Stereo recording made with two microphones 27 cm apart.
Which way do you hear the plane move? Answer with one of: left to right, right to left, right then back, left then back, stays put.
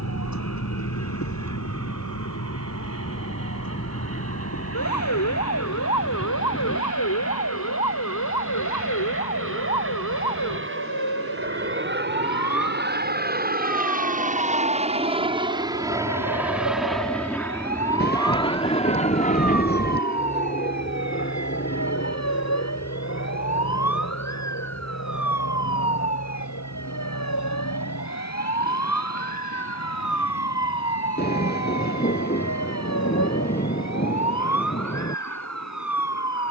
right to left.